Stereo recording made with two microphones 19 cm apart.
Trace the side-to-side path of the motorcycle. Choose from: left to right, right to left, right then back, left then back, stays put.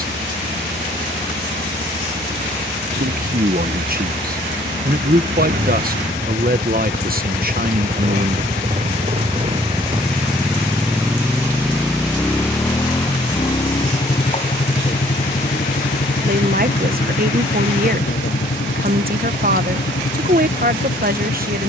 right to left.